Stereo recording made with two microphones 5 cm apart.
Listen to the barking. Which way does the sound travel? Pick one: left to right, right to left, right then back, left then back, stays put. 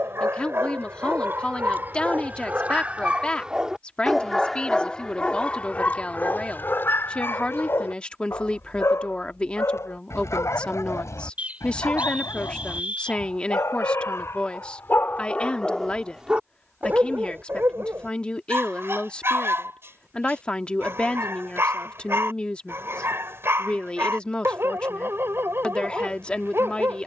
left then back.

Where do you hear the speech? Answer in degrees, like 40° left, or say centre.
20° left.